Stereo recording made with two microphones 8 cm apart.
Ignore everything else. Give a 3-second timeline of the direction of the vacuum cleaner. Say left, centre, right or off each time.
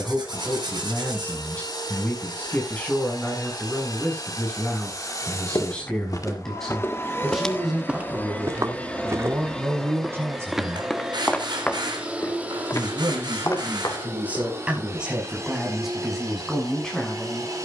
left, left, left, centre, right, right.